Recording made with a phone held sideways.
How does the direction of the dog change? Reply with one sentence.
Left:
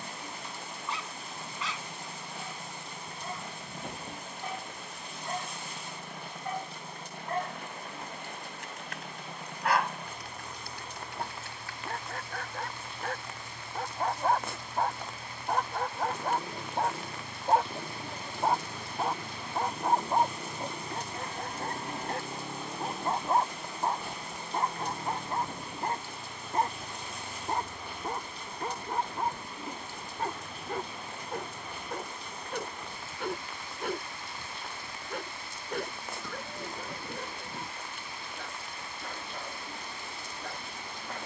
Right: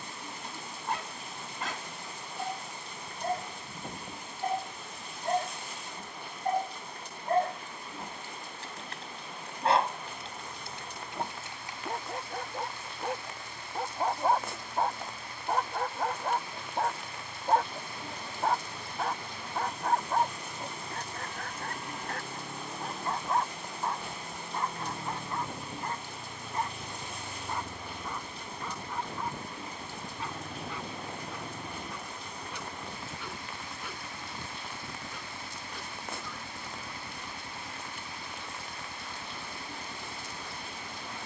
You can hear the dog move to the left.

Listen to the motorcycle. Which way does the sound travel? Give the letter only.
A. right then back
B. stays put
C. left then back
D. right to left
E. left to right
E.